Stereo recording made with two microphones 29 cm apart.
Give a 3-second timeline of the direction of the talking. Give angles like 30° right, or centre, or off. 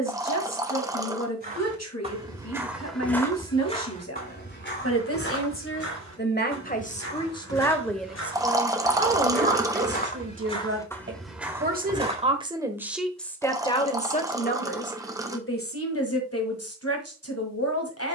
60° left, 50° left, 10° left, 40° right, 10° left, 50° left.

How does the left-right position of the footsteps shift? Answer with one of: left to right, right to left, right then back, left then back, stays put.
left then back.